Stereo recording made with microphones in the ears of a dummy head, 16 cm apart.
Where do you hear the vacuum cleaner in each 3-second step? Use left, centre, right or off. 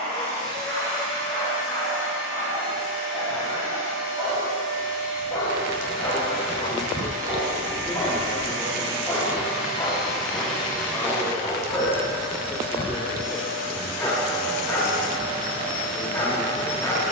right, right, right, centre, left, left.